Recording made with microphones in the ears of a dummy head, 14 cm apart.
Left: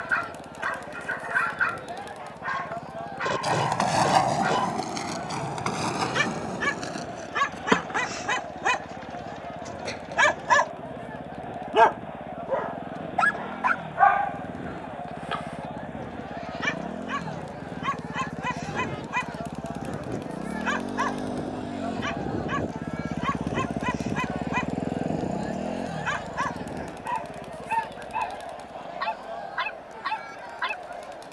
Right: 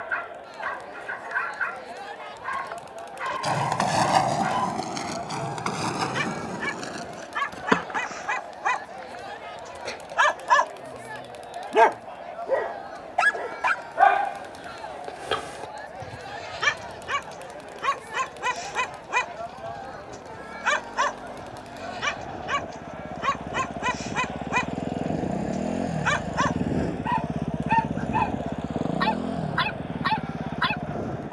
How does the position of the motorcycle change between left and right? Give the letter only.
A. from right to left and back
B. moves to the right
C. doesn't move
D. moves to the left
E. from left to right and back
B.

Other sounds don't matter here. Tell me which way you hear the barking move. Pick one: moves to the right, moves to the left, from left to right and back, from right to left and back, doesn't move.
moves to the right.